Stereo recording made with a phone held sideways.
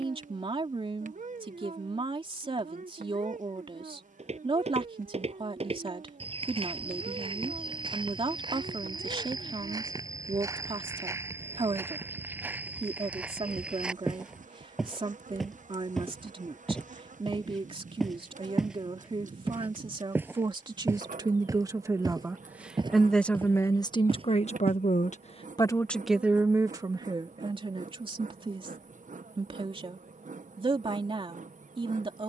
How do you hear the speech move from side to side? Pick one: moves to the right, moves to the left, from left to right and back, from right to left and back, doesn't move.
from right to left and back.